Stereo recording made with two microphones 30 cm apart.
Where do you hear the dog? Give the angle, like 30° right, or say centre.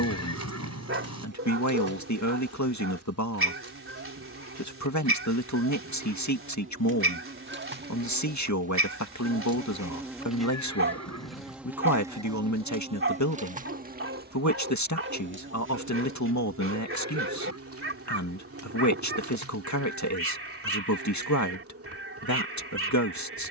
40° right.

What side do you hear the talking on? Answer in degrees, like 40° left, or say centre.
70° left.